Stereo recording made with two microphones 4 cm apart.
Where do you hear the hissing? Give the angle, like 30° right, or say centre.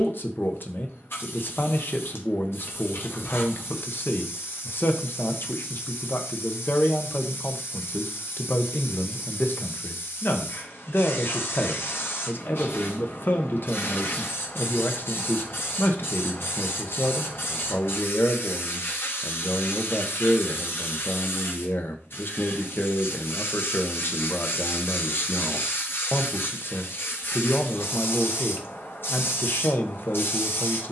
70° left.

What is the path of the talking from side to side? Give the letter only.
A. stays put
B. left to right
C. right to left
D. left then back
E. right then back
A.